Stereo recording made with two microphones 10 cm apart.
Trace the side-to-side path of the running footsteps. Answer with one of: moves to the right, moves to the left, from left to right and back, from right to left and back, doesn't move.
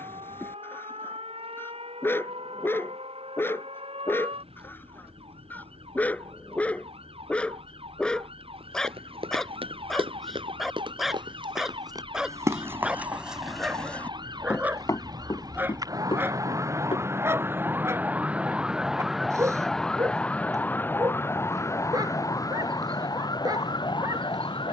moves to the left.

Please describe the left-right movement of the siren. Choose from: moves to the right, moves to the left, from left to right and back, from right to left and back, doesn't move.
moves to the left.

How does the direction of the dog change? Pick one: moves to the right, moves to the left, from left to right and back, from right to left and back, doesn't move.
moves to the right.